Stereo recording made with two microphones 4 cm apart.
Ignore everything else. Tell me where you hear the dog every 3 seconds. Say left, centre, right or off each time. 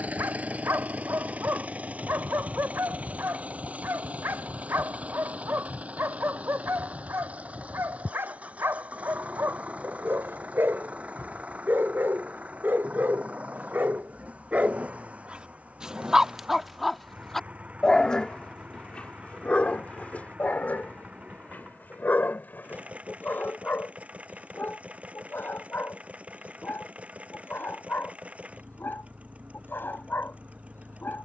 right, right, right, right, right, centre, left, left, left, left, left.